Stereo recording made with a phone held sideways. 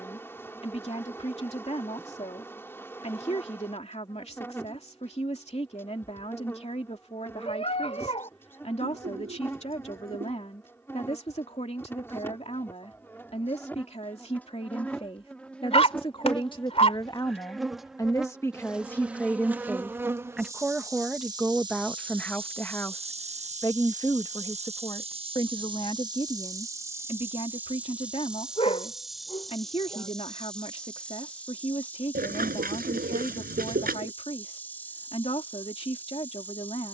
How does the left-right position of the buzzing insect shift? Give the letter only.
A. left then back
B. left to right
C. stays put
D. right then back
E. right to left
D.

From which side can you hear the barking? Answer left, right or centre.
left.